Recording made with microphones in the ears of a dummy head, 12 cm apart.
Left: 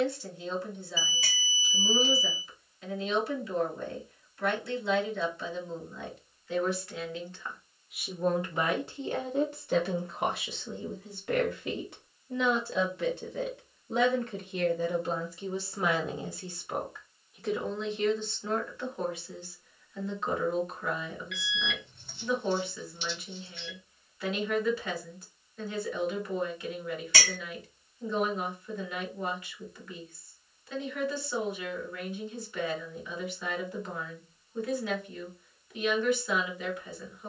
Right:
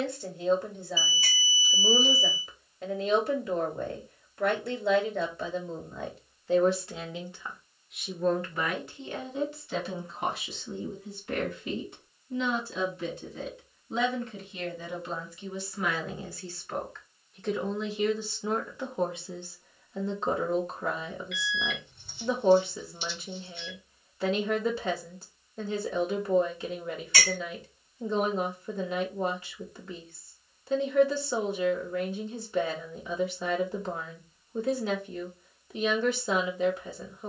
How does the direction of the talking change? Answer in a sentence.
You can hear the talking move from right to left and back again.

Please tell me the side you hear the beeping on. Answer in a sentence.
You can hear the beeping on the left.